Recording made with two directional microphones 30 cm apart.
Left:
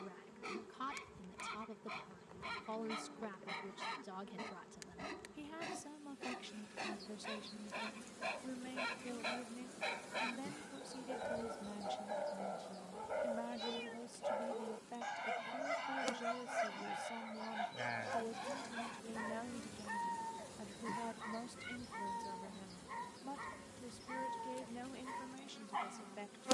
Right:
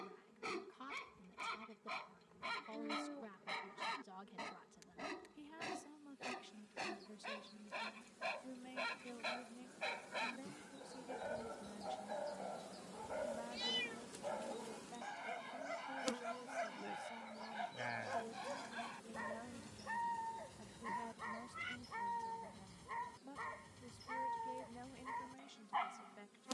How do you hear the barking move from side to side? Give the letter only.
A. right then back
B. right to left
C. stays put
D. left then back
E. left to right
D.